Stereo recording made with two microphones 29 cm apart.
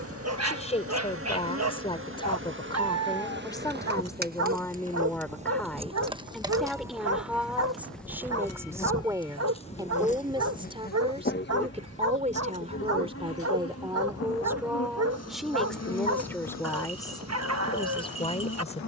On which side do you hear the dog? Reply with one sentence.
In this clip you hear the dog on the right.